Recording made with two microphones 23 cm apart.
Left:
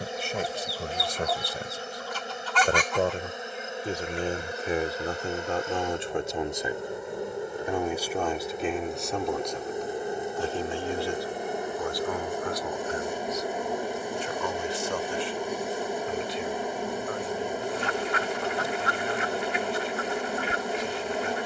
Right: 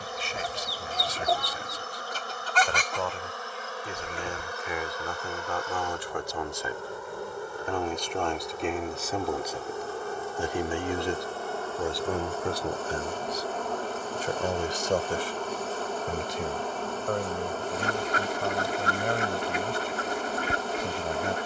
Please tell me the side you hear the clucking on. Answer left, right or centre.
right.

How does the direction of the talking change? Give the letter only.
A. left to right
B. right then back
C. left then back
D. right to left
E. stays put
A.